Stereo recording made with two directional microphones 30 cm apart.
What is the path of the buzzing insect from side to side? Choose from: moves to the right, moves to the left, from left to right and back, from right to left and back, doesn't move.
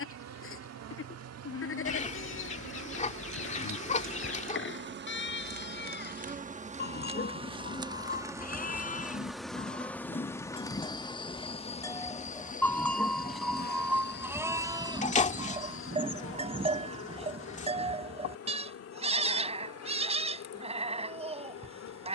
moves to the left.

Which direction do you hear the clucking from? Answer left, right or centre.
left.